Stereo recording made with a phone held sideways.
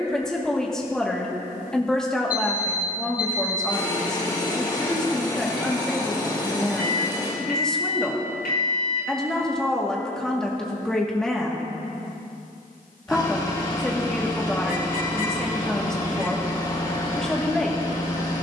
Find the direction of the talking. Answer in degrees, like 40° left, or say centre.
10° left.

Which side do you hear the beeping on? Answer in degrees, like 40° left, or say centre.
80° left.